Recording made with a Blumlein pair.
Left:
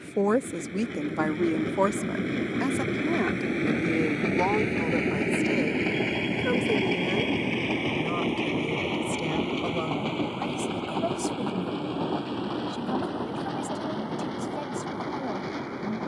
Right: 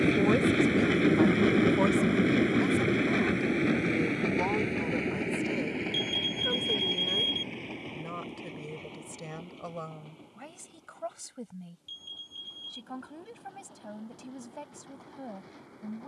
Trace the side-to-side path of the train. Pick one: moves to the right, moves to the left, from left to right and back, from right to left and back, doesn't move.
moves to the left.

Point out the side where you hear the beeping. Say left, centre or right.
right.